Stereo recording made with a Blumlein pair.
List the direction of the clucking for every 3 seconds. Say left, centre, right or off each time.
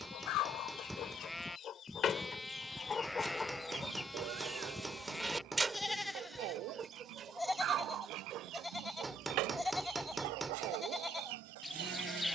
left, centre, right, right.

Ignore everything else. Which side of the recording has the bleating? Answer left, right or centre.
centre.